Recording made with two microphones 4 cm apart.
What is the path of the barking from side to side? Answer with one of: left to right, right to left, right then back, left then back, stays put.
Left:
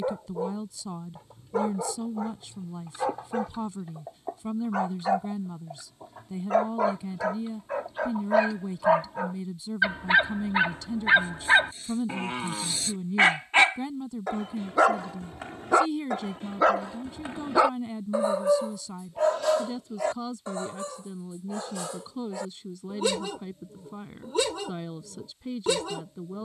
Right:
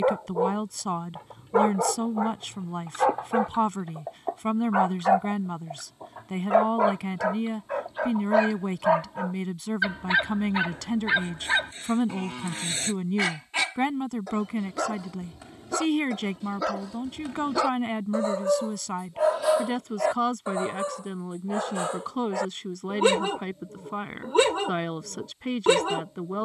left then back.